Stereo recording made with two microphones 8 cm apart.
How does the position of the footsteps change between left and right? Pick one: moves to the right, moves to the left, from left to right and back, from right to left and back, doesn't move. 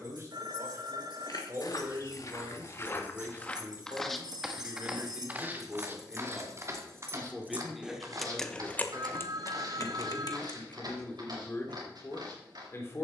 moves to the right.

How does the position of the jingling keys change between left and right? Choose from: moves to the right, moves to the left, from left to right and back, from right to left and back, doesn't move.
moves to the left.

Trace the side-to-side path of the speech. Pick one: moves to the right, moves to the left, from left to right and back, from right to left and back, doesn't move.
moves to the left.